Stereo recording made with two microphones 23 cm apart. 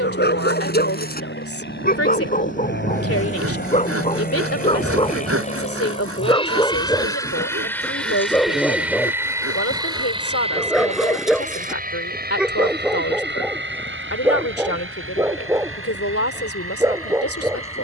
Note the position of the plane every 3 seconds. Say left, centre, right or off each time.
left, left, centre, right, right, right.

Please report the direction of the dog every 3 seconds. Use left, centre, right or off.
left, left, centre, centre, centre, centre.